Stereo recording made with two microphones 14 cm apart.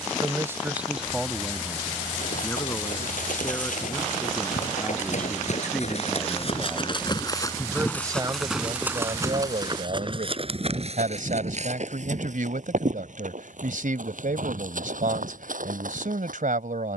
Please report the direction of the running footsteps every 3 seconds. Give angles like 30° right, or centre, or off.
70° left, 60° left, 20° left, 40° right, 60° right, 70° right.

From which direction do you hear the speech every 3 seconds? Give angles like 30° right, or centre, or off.
centre, 10° left, 20° right, 60° right, 70° right, 70° right.